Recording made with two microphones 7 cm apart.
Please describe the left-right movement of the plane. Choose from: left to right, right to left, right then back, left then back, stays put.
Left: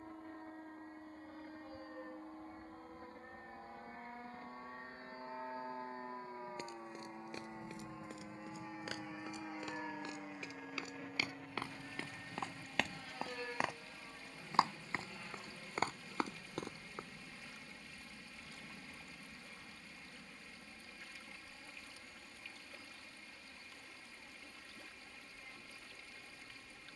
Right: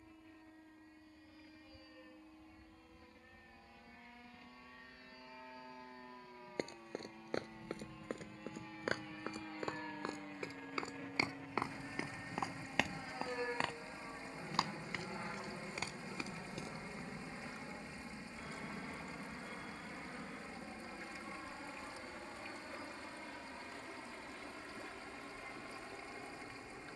left to right.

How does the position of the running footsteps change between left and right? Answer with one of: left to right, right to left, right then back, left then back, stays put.
right to left.